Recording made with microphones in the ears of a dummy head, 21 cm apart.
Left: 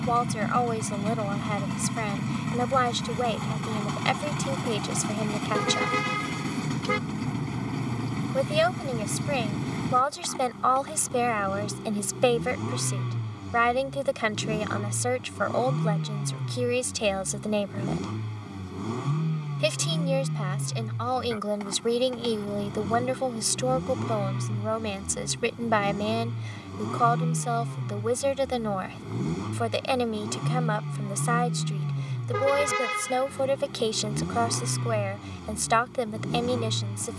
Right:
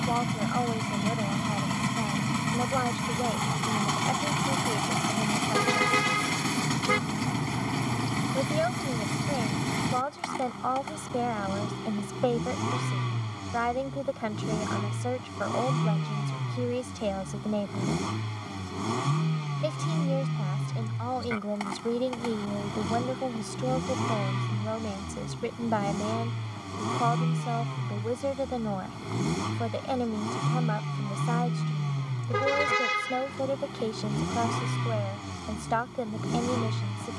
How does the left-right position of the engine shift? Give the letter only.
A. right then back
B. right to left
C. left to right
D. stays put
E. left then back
D.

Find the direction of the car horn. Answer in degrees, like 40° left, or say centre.
10° right.